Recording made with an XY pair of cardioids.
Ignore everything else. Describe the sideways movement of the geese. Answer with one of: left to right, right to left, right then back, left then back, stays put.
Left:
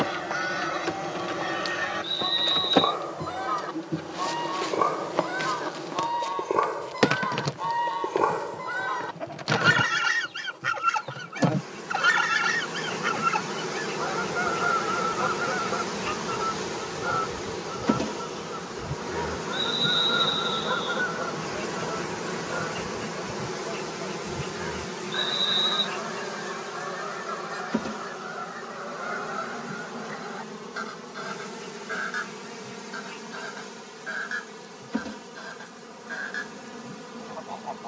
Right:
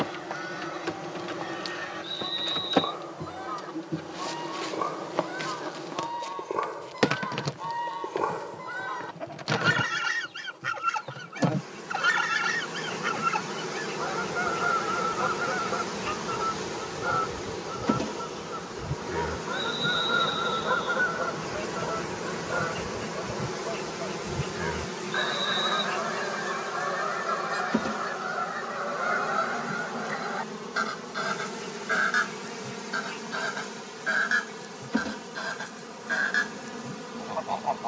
left to right.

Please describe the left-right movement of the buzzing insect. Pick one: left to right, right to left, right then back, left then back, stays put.
left to right.